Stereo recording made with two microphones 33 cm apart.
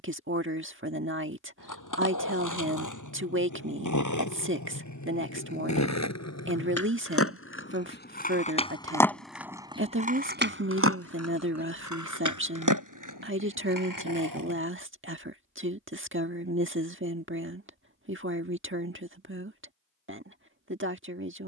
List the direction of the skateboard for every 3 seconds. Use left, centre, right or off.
left, left, left, right, right, off, off.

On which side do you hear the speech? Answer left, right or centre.
right.